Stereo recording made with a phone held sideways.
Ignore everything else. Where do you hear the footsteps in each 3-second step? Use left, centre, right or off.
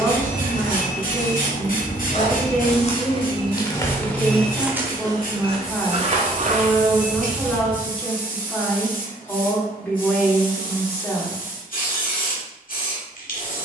left, centre, right, off, off.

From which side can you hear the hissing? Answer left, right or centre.
left.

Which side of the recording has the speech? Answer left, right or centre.
centre.